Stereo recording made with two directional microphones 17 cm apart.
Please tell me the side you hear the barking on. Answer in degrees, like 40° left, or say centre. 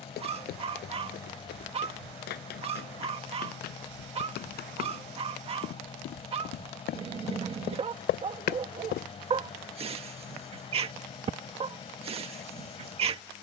40° right.